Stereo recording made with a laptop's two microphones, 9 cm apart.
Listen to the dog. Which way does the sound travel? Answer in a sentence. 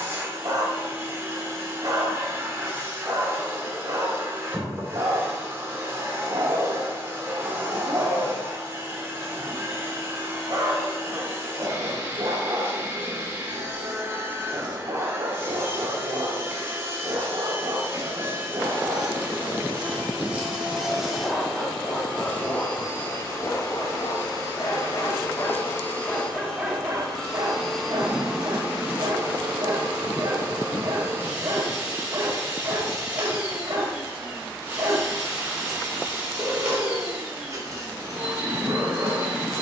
You can hear the dog go left and come back.